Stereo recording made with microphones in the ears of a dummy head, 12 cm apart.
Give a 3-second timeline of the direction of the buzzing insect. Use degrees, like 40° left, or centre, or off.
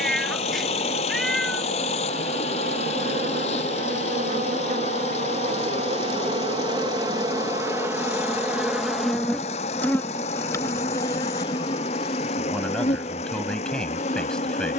70° right, 50° right, 20° right, 20° left, 50° left.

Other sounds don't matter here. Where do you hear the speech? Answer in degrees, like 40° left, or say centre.
10° left.